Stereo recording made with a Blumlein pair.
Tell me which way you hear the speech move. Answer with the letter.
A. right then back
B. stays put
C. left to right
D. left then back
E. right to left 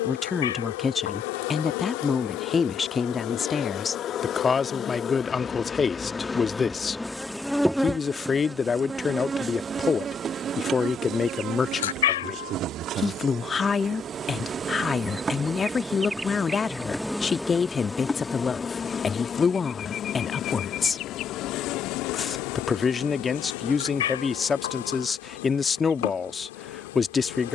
B.